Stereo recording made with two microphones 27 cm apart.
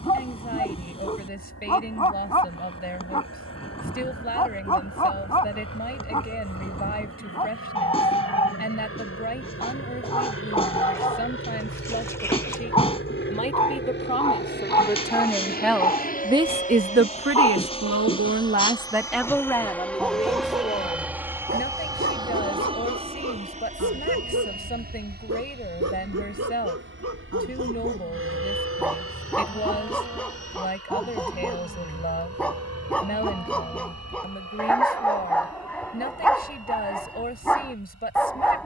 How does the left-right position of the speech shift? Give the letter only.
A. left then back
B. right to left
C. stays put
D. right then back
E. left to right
D.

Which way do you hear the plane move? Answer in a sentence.
In this clip you hear the plane move to the right.